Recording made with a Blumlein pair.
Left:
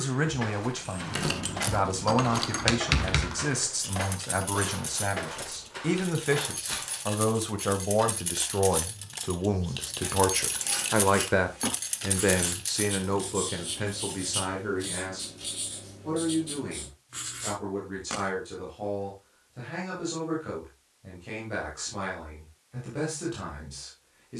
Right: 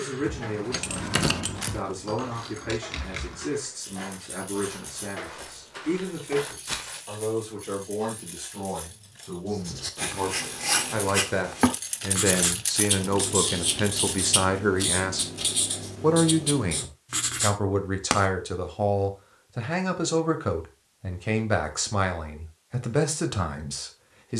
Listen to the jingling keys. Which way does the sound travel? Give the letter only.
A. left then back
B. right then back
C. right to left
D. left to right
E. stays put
A.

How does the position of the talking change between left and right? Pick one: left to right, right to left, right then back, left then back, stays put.
left to right.